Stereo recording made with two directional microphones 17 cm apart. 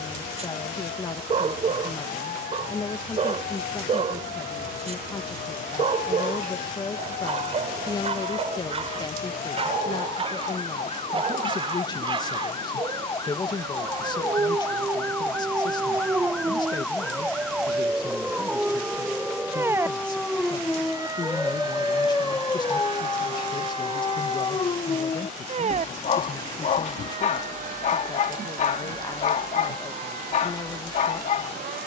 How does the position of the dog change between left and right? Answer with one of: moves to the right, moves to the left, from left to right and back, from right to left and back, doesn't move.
moves to the left.